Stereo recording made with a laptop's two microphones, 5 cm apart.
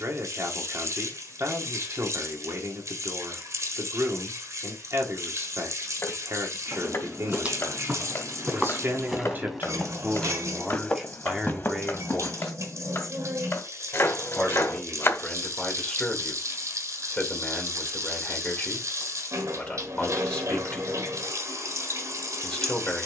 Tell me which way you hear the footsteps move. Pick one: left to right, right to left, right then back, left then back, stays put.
right to left.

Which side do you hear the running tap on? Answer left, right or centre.
right.